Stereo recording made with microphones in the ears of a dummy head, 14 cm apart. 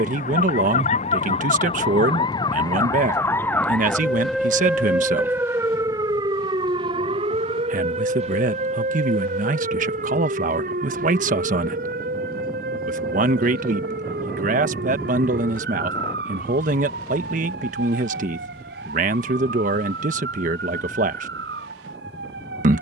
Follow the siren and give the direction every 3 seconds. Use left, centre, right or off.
left, centre, right, right, right, right, right, right.